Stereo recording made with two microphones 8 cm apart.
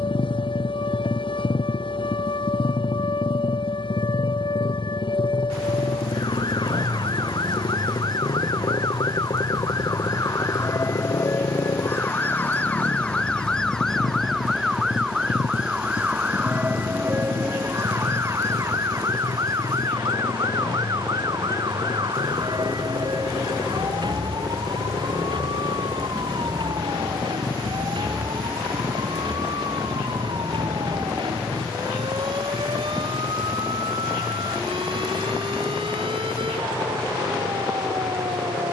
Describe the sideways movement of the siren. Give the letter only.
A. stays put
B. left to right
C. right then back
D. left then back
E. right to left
B.